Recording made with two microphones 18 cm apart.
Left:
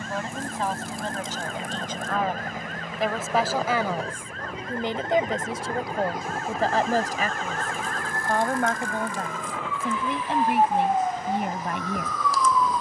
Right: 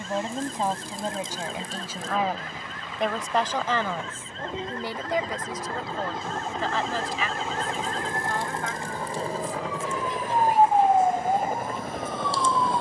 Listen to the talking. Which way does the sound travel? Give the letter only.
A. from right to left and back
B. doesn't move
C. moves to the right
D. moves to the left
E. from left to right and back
D.